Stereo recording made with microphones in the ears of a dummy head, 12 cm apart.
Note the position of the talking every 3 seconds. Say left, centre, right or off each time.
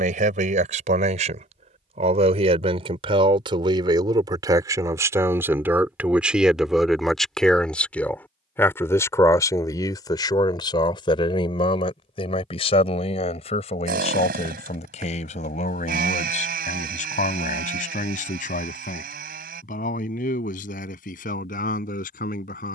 right, right, centre, left, left, left, left, left.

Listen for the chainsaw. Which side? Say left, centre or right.
right.